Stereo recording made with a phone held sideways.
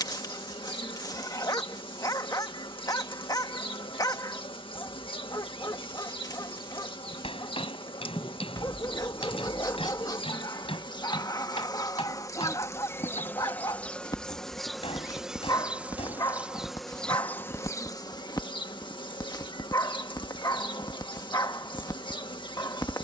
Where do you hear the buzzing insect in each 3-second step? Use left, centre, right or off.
left, left, left, left, centre, centre, left, left.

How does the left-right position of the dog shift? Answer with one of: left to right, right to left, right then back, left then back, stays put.
stays put.